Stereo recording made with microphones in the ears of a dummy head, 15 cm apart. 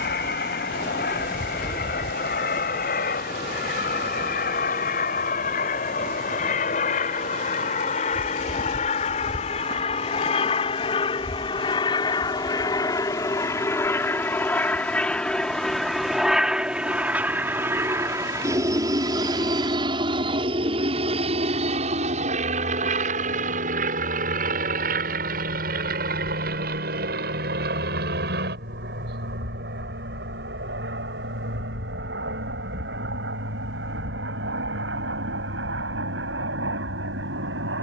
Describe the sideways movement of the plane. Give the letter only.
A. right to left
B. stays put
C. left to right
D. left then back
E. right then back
C.